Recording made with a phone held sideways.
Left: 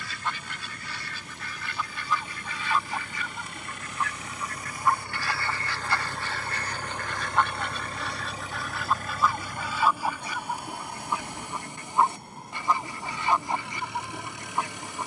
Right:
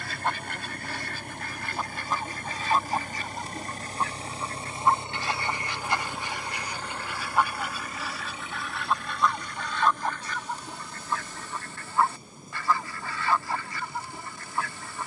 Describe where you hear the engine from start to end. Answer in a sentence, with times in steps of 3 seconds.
You can hear the engine on the right from 0 s and on the left from 6 s.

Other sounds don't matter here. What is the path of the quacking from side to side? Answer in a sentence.
In this clip you hear the quacking move to the left.